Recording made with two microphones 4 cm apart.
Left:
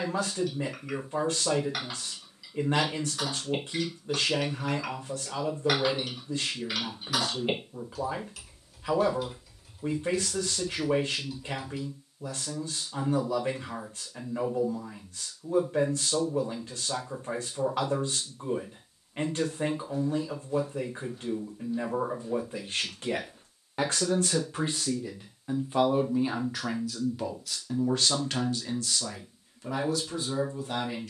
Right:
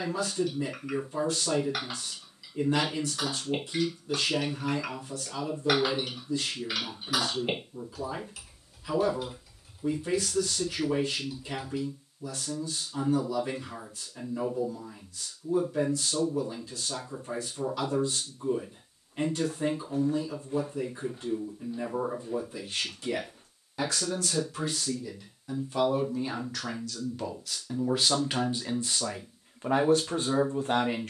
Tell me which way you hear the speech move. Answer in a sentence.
In this clip you hear the speech travel towards the right.